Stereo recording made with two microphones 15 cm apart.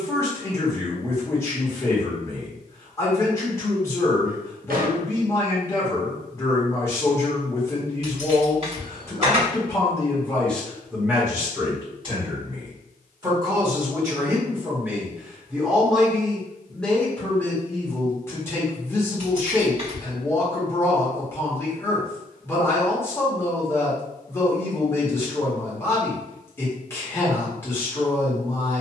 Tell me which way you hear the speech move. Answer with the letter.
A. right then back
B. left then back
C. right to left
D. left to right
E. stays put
A.